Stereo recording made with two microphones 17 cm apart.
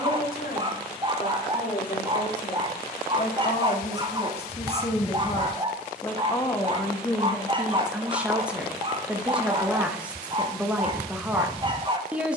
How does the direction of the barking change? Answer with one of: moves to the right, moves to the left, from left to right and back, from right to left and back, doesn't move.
doesn't move.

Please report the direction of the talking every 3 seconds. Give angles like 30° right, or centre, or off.
50° left, 40° left, centre, 10° right.